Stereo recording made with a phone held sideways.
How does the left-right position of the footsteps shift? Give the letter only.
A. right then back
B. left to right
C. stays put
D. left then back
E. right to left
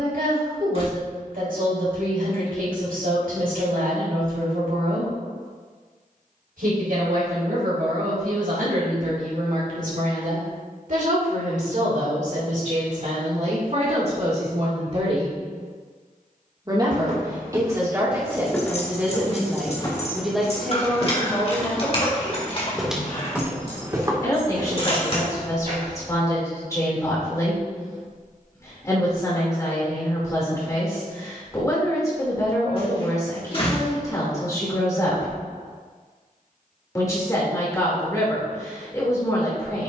D.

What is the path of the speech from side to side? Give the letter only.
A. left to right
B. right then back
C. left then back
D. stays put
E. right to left
E.